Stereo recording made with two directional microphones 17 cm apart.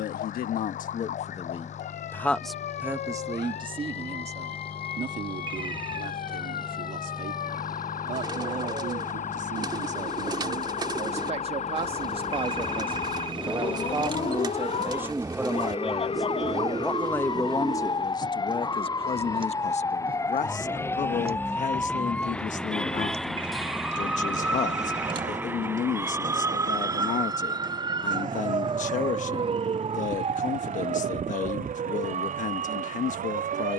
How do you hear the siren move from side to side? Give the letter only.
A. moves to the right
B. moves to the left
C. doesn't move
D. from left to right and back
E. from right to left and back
A.